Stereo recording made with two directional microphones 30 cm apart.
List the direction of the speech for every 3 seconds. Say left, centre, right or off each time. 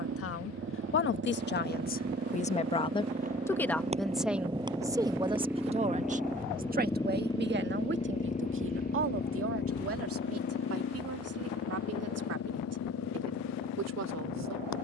left, centre, right, right, right.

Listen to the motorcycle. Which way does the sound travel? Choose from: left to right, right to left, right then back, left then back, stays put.
right to left.